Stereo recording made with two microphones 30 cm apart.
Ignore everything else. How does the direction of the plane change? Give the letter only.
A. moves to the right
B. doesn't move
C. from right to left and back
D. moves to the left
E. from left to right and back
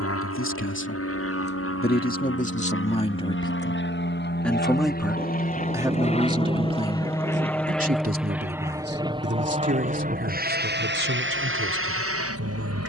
A.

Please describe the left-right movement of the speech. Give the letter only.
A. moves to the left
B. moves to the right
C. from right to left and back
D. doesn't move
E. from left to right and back
B.